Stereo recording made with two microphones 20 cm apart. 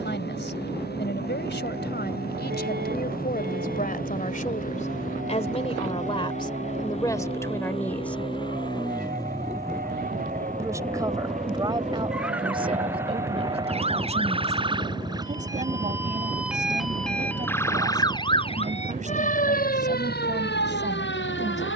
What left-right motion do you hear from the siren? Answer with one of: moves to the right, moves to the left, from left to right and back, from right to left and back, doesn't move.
moves to the left.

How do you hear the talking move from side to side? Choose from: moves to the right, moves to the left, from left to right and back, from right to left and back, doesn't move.
moves to the right.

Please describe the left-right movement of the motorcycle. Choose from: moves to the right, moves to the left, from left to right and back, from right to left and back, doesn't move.
moves to the right.